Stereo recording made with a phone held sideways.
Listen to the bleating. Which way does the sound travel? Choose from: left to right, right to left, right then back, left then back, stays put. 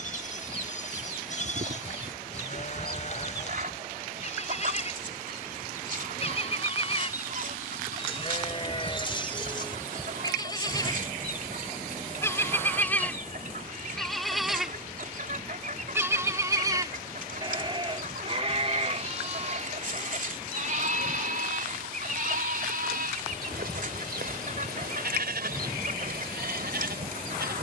left to right.